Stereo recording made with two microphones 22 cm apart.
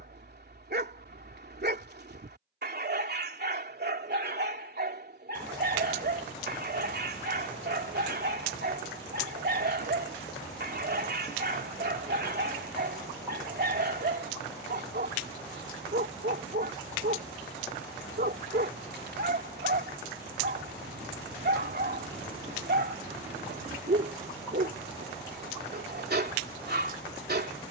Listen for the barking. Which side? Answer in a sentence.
You can hear the barking on the right.